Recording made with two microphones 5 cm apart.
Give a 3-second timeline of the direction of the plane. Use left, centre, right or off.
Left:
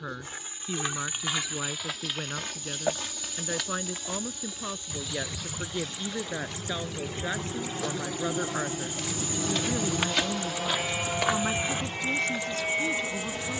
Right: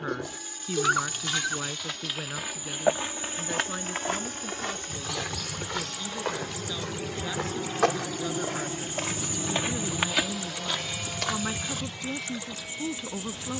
right, right, centre, left, left.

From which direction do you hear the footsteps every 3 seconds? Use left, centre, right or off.
centre, right, right, centre, off.